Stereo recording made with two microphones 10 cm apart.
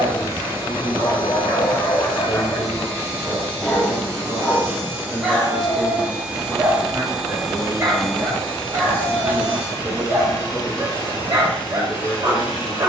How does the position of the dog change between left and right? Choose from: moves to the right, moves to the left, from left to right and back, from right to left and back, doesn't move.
moves to the right.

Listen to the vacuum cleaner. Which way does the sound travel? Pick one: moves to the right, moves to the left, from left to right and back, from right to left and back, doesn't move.
moves to the left.